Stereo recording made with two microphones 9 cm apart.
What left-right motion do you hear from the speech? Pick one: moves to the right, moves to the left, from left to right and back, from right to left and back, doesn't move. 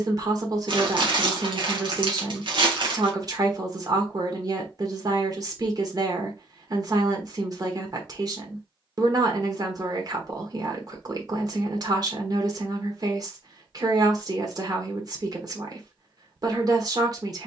doesn't move.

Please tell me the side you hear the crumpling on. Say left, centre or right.
right.